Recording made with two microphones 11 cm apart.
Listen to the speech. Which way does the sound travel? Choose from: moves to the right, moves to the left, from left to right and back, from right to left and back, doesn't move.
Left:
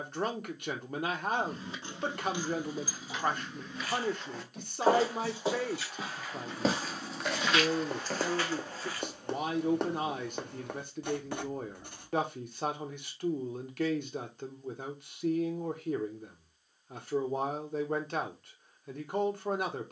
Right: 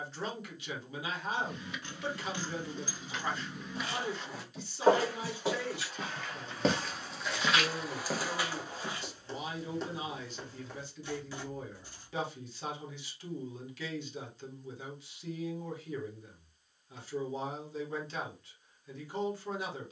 doesn't move.